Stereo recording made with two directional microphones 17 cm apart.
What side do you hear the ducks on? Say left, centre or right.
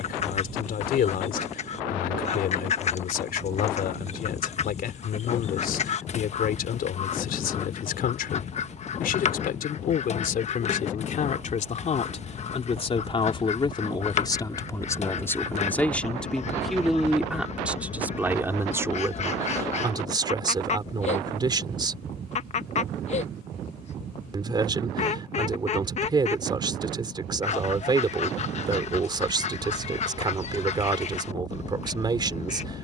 left.